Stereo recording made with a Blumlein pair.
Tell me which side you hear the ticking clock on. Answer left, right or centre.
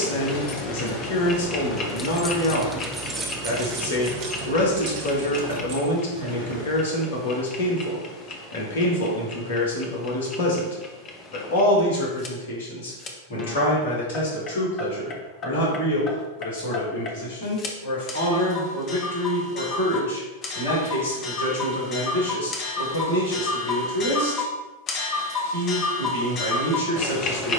left.